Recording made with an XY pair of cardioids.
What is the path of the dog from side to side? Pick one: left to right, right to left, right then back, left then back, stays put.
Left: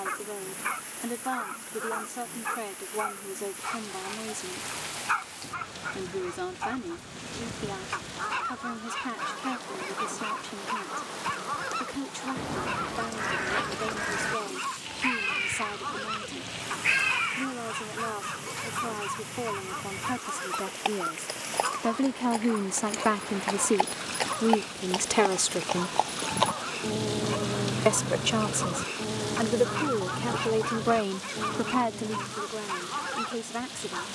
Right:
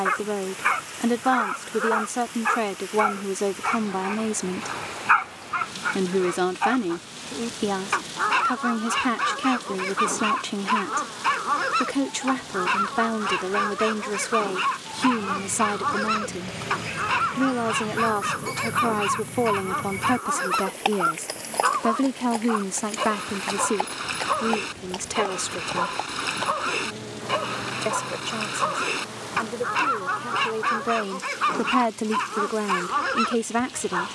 stays put.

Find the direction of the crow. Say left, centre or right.
left.